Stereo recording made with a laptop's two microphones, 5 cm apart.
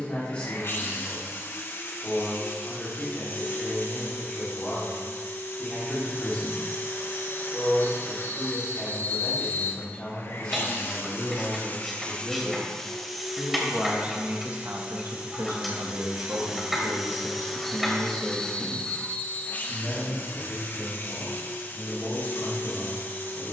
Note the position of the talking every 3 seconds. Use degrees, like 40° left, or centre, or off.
30° left, 30° left, 30° left, 20° left, 20° right, 60° right, 10° left, 20° left.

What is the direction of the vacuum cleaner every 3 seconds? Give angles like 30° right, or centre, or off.
50° left, 50° left, 50° left, 50° left, centre, 10° right, 30° left, 50° left.